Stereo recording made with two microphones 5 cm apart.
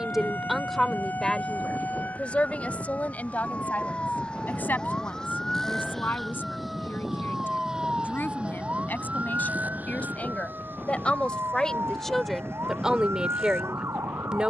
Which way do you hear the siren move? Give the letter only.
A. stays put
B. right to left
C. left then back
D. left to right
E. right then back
D.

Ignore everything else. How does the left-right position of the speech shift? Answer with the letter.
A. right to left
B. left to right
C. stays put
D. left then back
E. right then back
D.